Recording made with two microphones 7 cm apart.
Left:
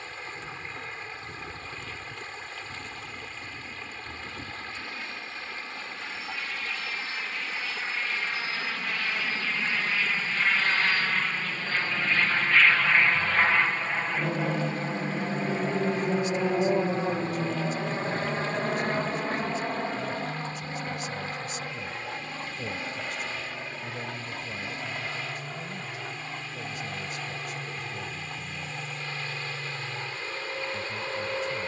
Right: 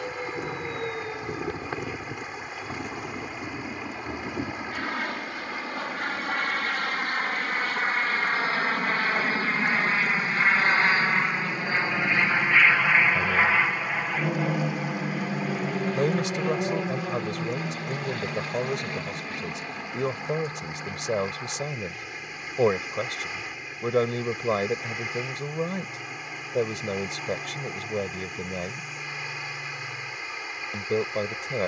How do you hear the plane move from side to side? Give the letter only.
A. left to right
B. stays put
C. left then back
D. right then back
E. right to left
E.